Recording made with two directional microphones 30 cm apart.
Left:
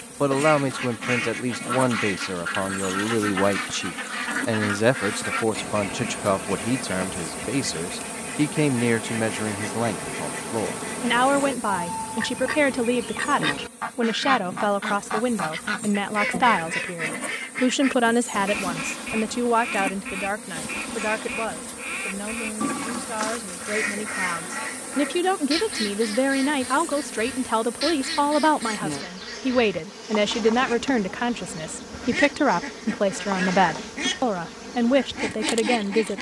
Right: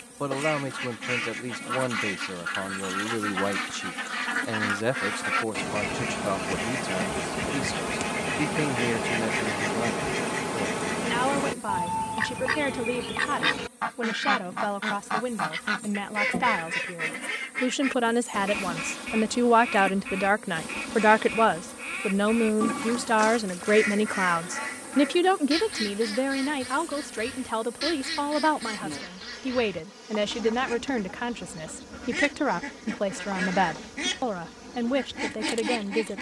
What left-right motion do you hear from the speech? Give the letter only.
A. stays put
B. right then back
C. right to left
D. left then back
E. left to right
B.